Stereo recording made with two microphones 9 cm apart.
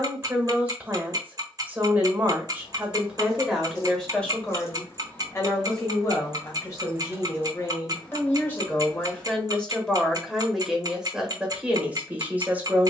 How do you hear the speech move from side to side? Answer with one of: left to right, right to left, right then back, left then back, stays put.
left then back.